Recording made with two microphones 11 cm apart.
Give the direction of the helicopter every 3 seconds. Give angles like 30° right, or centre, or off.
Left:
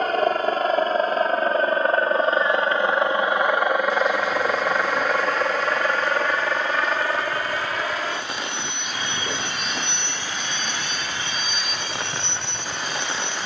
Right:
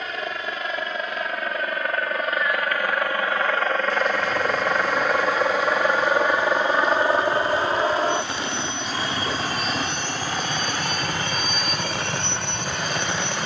40° left, 10° left, 20° right, 40° right, 50° right.